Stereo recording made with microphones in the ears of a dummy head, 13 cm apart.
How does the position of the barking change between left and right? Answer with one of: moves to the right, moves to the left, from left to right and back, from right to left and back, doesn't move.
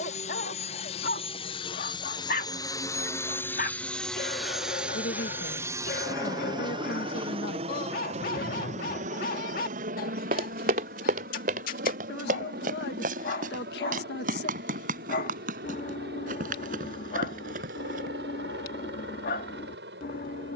doesn't move.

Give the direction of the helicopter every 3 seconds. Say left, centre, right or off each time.
left, centre, right, right, right, right, right.